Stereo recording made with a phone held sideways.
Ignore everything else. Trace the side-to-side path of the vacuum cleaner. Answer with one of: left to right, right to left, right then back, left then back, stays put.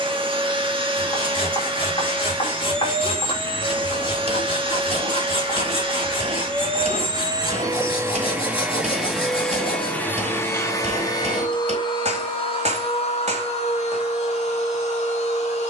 right to left.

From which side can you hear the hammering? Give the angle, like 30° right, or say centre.
40° right.